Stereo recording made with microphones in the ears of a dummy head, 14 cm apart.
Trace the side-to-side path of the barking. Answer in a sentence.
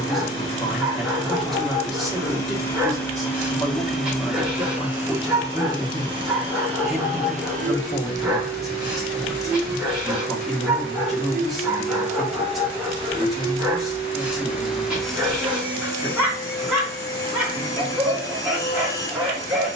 In this clip you hear the barking stay put.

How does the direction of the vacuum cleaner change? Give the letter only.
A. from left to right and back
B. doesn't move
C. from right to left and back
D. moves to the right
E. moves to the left
A.